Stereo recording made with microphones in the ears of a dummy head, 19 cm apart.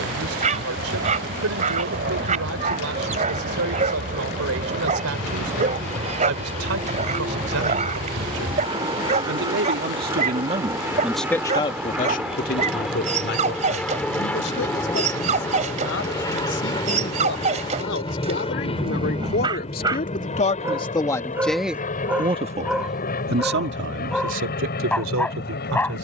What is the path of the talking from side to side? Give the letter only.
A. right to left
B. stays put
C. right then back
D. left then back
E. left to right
D.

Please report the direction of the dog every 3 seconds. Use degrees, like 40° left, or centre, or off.
30° right, 30° right, 30° right, 30° right, 30° right, 30° right, 20° right, 10° right, 10° left.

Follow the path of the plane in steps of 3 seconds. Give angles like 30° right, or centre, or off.
50° right, 40° right, 30° right, 10° right, centre, 20° left, 30° left, 40° left, 50° left.